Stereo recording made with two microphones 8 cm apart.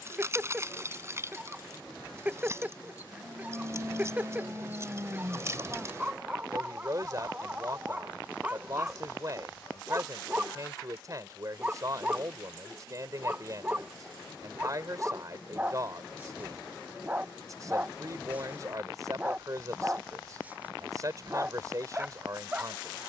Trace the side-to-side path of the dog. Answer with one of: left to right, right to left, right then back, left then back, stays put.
stays put.